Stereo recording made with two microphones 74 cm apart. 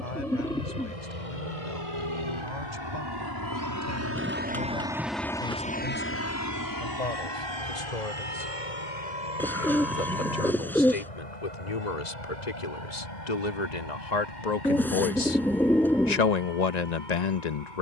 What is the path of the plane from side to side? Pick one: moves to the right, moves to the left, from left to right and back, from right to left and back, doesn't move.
moves to the left.